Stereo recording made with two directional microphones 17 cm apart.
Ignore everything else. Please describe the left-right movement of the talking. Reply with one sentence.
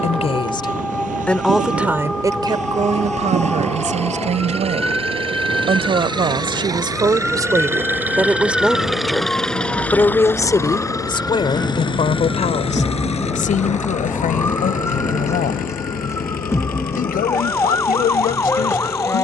You can hear the talking move from left to right and back again.